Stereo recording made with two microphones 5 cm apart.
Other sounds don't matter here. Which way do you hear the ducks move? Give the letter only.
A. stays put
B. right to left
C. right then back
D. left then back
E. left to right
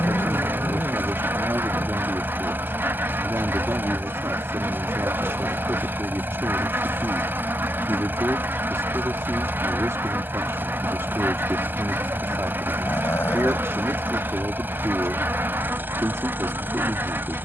A.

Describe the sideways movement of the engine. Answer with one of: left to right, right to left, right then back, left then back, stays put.
stays put.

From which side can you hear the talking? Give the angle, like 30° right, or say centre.
80° right.